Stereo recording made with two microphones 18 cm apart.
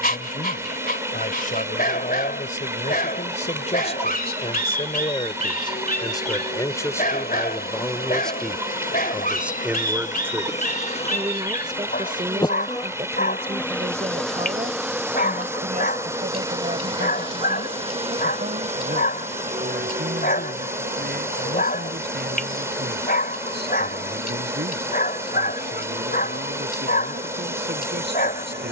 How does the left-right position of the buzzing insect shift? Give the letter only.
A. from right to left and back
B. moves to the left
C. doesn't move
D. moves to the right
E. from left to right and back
D.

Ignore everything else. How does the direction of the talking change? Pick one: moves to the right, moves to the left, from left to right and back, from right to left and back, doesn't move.
moves to the right.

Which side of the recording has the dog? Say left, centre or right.
left.